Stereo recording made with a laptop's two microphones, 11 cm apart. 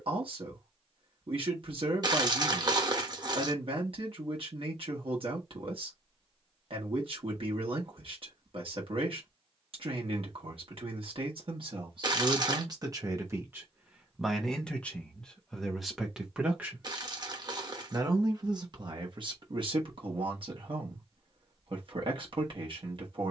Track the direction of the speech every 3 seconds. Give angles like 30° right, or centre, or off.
60° right, 60° right, 60° right, 60° right, 20° right, 10° right, 50° right, 50° right.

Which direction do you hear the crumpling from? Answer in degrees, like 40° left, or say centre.
40° right.